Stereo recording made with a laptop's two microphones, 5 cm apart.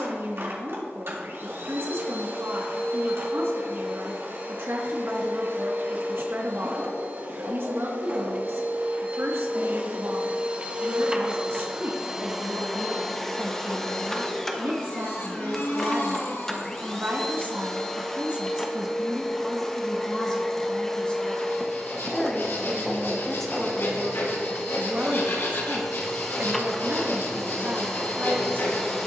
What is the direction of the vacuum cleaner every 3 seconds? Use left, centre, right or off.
right, right, right, right, centre, centre, centre, centre, centre, centre.